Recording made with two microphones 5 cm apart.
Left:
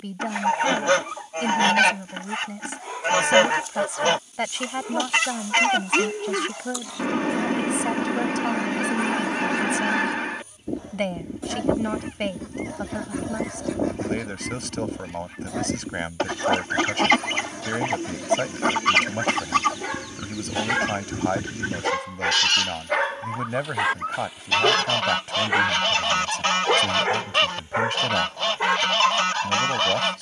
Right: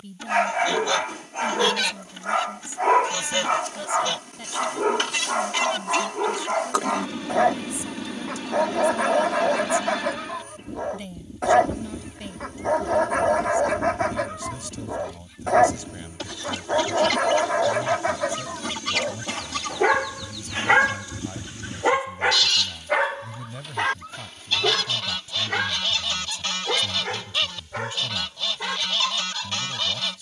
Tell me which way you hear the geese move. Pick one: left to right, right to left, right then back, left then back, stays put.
stays put.